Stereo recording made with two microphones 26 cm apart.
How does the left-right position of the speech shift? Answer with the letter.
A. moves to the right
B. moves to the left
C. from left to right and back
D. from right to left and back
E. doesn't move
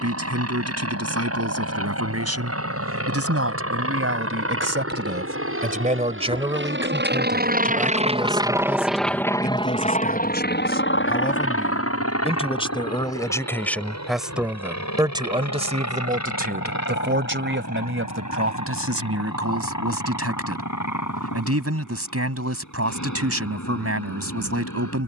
D.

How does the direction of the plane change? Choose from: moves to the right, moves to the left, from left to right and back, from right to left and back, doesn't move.
moves to the left.